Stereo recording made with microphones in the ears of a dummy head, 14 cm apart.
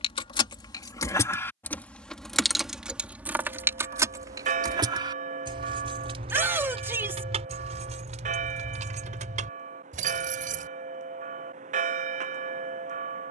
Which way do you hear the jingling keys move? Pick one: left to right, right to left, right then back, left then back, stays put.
left to right.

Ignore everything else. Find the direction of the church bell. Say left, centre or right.
right.